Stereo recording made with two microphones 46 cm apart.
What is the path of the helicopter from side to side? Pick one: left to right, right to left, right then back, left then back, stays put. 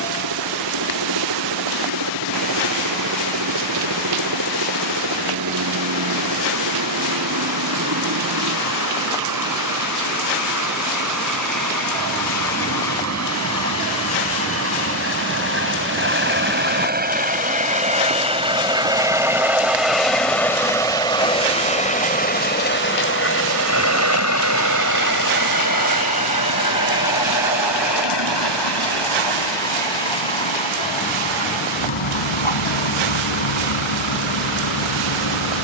right to left.